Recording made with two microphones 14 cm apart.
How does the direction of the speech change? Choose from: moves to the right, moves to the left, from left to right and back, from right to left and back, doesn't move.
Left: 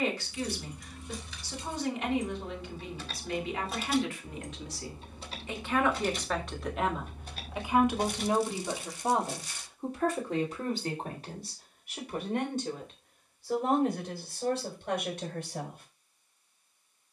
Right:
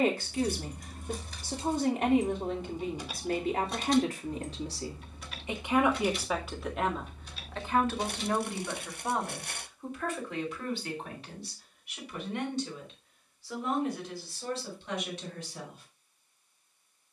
moves to the left.